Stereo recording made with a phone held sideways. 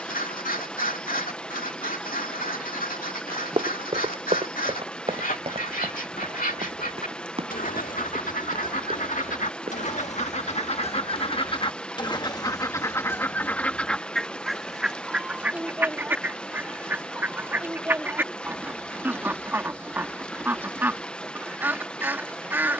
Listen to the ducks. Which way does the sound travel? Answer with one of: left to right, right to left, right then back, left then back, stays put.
left to right.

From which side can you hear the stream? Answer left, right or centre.
centre.